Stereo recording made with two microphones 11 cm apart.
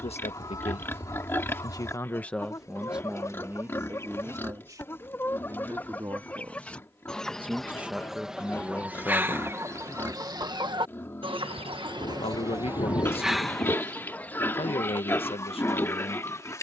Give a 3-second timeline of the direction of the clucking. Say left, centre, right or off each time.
left, left, centre, right, centre, left.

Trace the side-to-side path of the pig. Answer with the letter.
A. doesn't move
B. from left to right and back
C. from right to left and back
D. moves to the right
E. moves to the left
A.